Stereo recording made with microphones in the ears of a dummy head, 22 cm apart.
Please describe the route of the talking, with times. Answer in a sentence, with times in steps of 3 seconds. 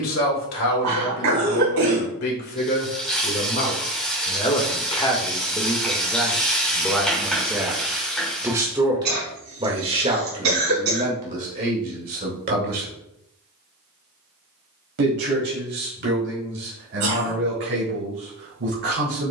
You can hear the talking on the left from 0 s, in the centre from 6 s and on the right from 9 s.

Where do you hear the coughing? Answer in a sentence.
In this clip you hear the coughing on the right.